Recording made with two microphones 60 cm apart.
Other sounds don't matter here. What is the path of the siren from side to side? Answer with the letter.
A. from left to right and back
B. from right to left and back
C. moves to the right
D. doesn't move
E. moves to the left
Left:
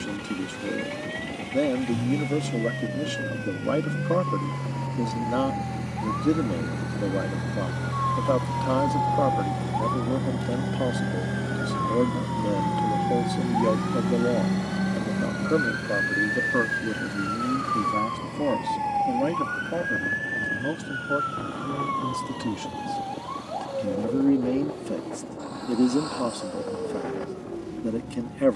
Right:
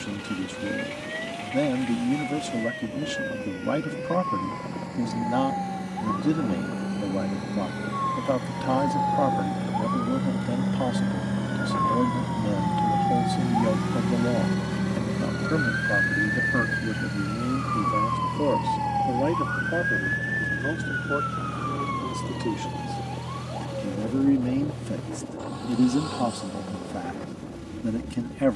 E.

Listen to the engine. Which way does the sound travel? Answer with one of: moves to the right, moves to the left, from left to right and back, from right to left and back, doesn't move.
moves to the right.